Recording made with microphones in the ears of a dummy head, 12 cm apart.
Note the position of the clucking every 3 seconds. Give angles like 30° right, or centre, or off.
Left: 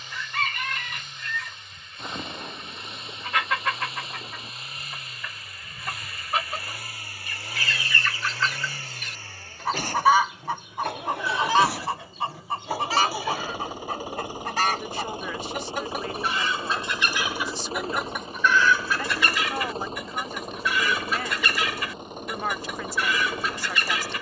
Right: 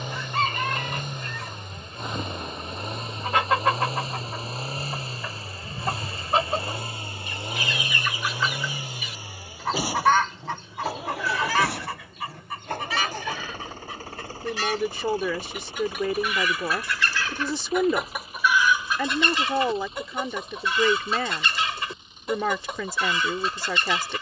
30° right, 30° right, 20° right, 10° left, 40° left, 30° left, 20° right, 30° right.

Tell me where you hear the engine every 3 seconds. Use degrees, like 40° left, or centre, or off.
40° right, 30° right, 20° right, 10° right, 10° left, 30° left, 40° left, 50° left.